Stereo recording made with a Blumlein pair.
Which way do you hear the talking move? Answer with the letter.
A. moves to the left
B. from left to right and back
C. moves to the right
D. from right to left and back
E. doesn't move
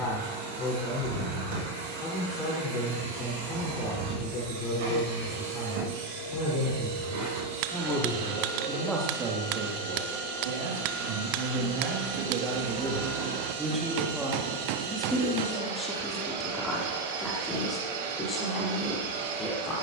B.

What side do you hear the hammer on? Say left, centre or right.
right.